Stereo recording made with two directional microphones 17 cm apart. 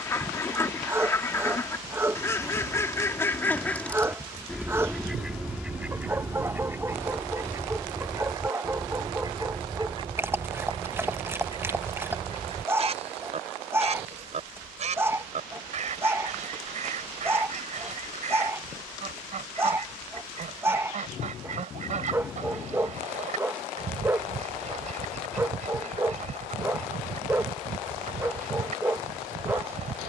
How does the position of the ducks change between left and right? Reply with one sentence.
You can hear the ducks go from the left side to the right.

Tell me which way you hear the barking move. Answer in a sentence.
You can hear the barking stay put.